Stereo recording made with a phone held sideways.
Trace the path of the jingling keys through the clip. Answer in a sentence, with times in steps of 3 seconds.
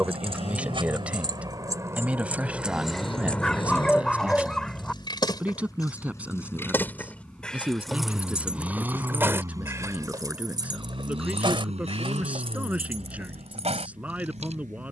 In this clip you hear the jingling keys on the right from 0 s, on the left from 3 s, in the centre from 6 s and on the right from 9 s.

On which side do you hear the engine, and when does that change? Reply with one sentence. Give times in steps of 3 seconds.
In this clip you hear the engine on the left from 0 s, in the centre from 6 s and on the right from 9 s.